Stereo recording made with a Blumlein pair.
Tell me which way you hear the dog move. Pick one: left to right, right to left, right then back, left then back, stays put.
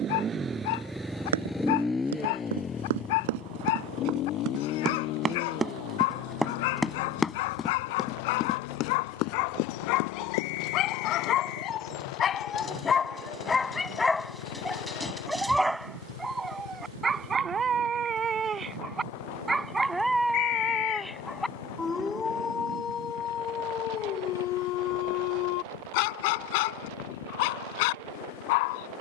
right then back.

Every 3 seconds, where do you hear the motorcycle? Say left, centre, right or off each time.
centre, left, left, left, left, left, left, left, left, left.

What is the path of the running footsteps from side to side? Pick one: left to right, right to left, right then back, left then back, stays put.
right to left.